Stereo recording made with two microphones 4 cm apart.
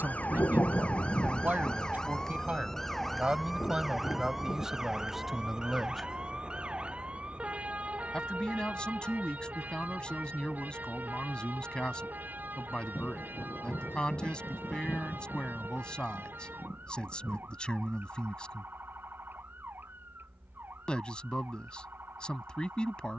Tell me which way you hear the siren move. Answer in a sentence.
You can hear the siren move to the right.